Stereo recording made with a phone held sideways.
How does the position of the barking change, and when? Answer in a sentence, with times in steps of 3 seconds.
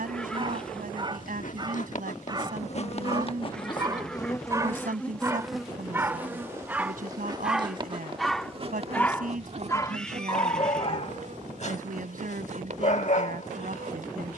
You can hear the barking on the right from 0 s, in the centre from 6 s and on the left from 9 s.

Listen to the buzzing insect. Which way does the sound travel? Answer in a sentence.
In this clip you hear the buzzing insect travel towards the right.